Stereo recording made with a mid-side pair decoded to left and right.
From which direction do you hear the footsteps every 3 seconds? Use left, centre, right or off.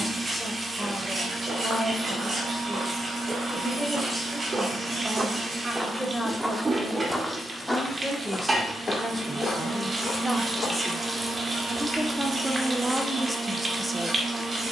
right, right, centre, left, off.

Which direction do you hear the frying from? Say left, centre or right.
right.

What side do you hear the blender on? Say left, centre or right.
right.